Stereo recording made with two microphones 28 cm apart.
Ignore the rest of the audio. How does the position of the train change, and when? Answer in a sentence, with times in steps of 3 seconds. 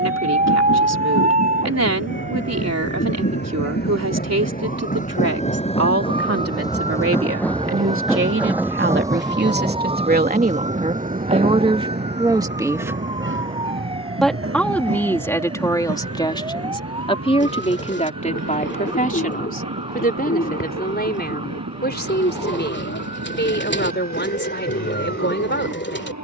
You can hear the train on the left from 0 s, in the centre from 6 s and on the right from 9 s.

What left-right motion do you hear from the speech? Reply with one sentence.
You can hear the speech move from right to left.